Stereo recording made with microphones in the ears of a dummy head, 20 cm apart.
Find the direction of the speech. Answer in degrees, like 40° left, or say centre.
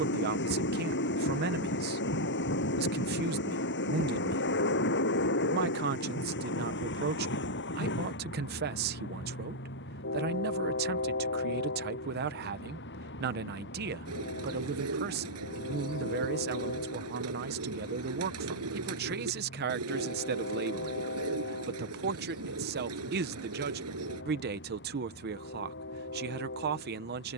40° right.